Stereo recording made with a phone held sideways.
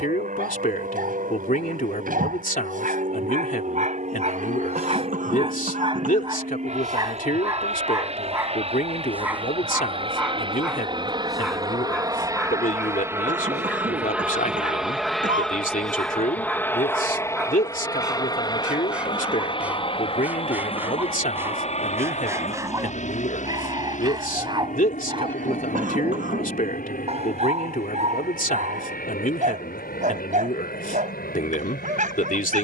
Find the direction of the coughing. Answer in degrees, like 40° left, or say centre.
60° right.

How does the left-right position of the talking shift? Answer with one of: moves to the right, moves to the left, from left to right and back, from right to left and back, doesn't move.
doesn't move.